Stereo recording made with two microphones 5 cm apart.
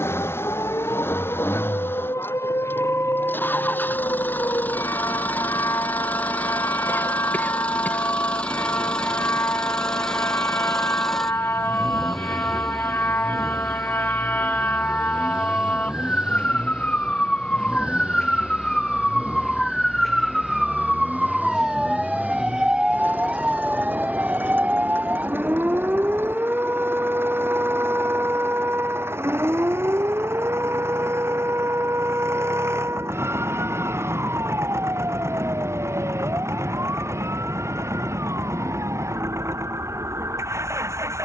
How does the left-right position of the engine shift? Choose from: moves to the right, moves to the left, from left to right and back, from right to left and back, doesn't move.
moves to the right.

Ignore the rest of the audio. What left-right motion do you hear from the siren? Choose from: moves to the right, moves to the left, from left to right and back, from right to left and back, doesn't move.
moves to the right.